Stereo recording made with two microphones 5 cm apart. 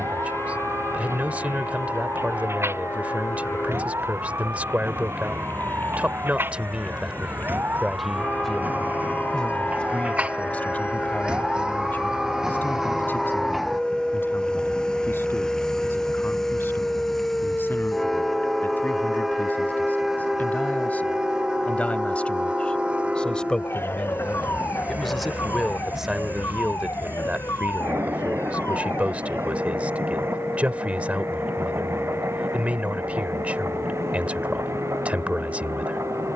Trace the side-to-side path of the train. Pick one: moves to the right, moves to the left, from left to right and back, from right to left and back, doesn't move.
moves to the right.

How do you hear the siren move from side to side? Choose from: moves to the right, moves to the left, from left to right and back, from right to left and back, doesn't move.
moves to the left.